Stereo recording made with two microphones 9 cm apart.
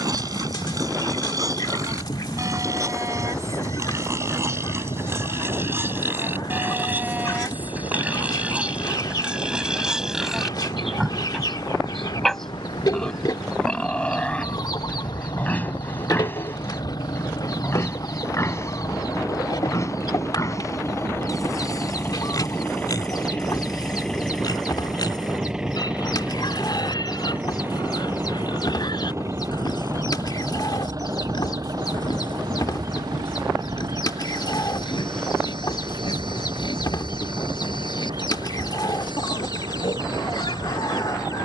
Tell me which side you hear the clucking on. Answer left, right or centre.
left.